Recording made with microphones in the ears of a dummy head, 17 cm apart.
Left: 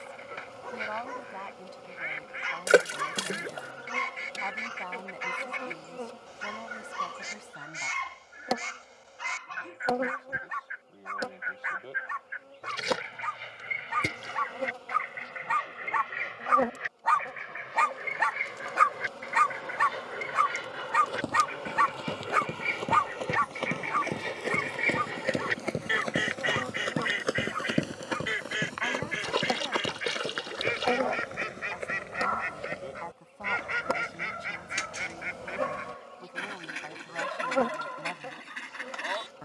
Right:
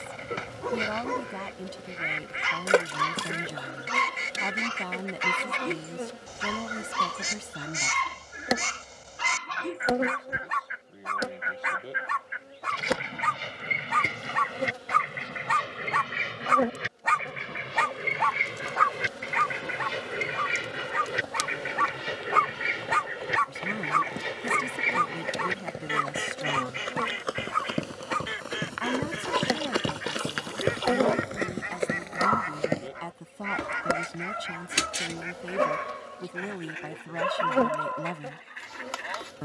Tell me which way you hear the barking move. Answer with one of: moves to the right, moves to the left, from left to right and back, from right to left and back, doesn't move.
from right to left and back.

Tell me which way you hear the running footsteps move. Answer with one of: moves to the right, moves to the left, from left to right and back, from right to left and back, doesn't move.
moves to the right.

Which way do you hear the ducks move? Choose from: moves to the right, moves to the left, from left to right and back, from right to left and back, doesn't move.
moves to the left.